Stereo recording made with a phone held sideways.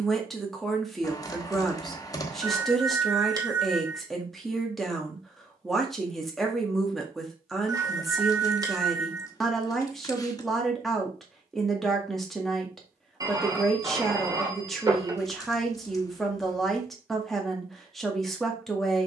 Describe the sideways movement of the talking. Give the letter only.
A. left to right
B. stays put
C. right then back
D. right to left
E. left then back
B.